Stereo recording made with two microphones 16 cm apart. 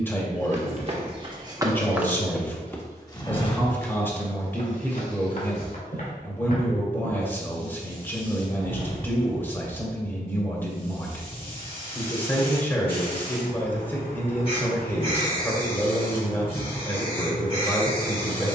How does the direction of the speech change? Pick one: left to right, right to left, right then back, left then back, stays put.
stays put.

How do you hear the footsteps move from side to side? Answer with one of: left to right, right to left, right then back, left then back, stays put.
right to left.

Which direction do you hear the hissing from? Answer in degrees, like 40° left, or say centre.
40° left.